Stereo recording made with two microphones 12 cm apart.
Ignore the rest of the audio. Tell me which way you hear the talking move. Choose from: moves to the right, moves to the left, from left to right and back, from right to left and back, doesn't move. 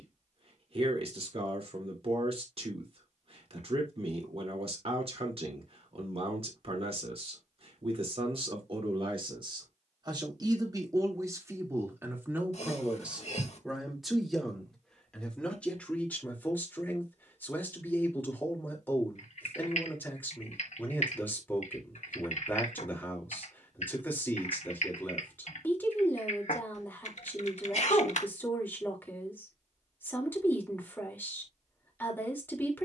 moves to the left.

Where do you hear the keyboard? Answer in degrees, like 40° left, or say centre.
70° left.